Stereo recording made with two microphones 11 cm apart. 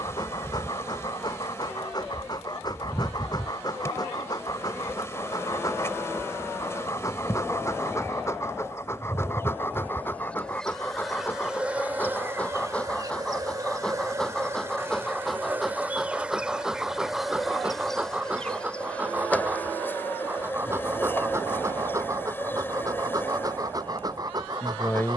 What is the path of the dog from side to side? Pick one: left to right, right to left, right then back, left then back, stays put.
left to right.